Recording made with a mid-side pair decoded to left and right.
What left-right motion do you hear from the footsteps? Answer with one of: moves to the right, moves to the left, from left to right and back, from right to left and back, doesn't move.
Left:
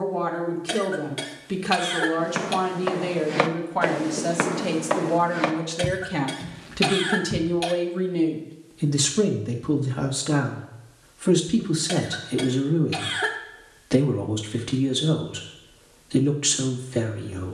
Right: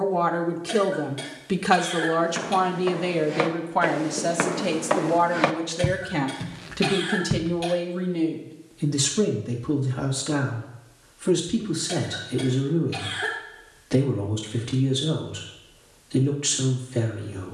moves to the right.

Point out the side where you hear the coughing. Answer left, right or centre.
left.